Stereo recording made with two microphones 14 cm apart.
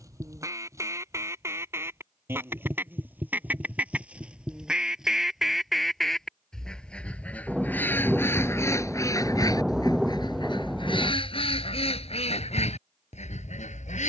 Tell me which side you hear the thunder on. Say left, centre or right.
centre.